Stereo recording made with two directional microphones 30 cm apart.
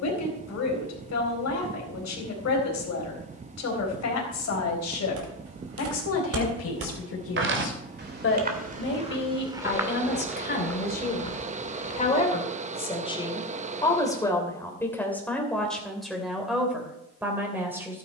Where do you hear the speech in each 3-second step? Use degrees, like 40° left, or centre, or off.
60° left, 60° left, 50° left, 30° left, 10° left, centre.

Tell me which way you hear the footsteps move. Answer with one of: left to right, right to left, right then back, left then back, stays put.
right to left.